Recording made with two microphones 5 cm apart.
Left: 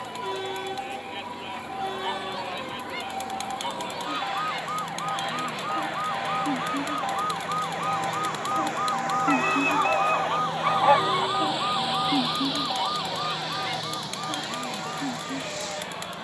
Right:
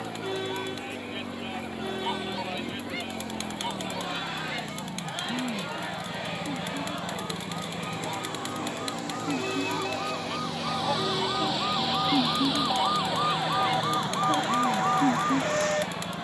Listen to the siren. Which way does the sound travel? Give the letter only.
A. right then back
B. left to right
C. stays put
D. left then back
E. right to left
B.